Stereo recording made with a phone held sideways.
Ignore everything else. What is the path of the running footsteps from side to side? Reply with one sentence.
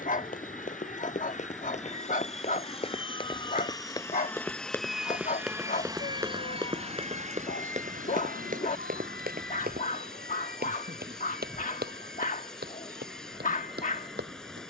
In this clip you hear the running footsteps move from left to right.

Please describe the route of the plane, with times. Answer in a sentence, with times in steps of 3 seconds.
In this clip you hear the plane on the left from 0 s, in the centre from 3 s and on the right from 6 s.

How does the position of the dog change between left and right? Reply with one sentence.
You can hear the dog stay put.